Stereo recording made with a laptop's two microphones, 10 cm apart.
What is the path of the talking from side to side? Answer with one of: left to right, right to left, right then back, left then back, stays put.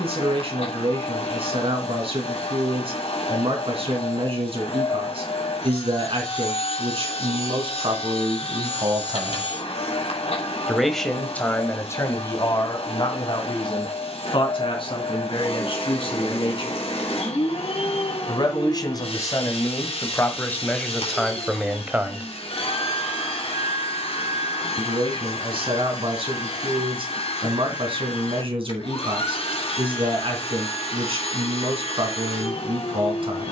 left then back.